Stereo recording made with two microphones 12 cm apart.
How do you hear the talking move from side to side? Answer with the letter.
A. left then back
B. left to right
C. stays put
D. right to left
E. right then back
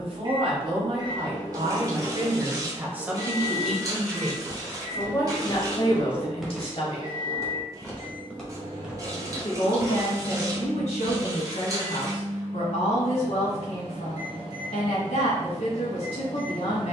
D.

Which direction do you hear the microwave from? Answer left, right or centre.
right.